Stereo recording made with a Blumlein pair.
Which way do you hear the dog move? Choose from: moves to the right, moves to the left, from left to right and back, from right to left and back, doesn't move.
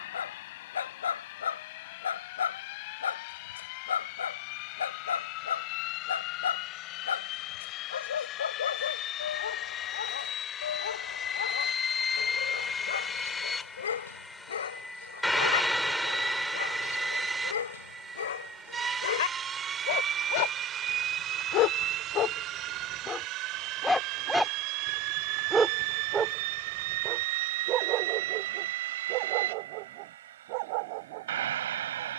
moves to the right.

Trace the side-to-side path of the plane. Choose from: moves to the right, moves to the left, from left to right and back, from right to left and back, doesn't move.
moves to the right.